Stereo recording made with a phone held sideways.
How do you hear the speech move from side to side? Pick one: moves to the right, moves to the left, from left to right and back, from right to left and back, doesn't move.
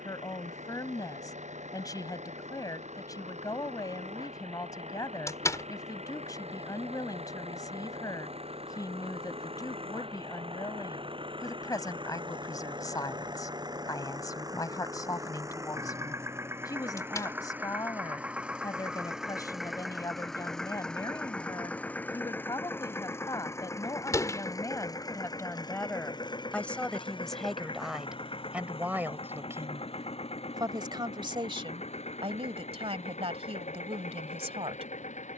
moves to the right.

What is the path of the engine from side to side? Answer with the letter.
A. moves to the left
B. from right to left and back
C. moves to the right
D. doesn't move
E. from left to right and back
A.